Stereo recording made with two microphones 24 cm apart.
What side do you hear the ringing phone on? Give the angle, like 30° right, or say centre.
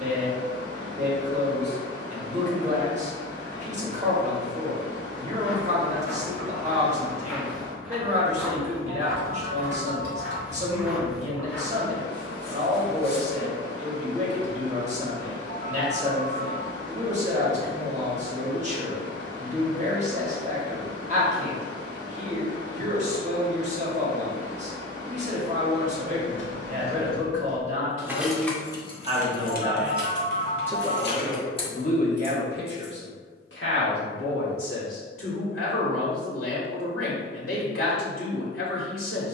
60° left.